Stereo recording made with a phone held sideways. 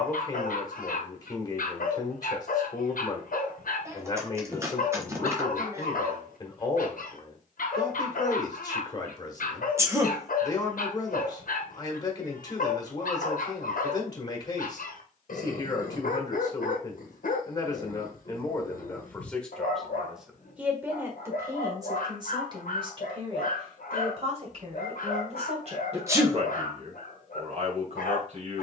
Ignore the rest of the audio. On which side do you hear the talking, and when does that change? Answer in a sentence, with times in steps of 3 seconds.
You can hear the talking on the left from 0 s, in the centre from 18 s and on the right from 21 s.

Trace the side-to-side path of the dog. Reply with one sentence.
In this clip you hear the dog stay in one place.